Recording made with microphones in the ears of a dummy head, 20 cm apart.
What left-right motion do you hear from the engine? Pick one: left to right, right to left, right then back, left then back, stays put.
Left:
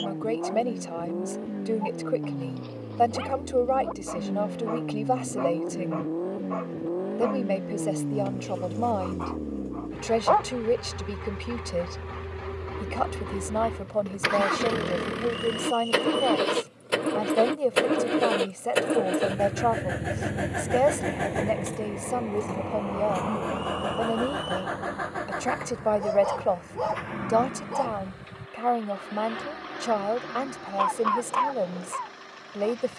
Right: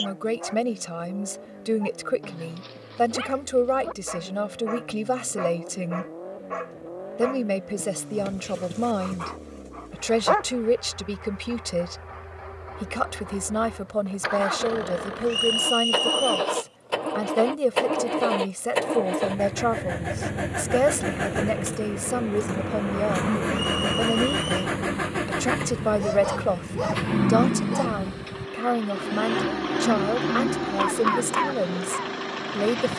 left to right.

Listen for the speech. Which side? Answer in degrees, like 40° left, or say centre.
20° right.